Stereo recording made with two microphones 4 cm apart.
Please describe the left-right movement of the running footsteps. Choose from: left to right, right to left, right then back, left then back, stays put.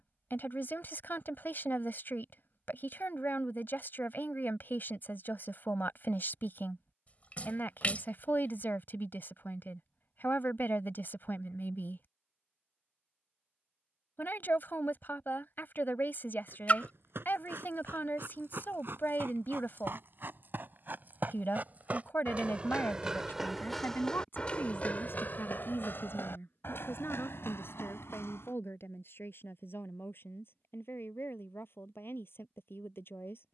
right to left.